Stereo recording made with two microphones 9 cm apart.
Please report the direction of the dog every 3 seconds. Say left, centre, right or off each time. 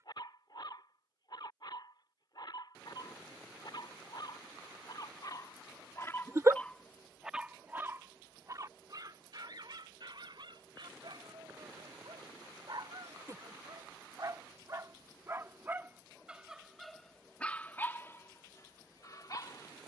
left, left, centre, right, right, centre, left.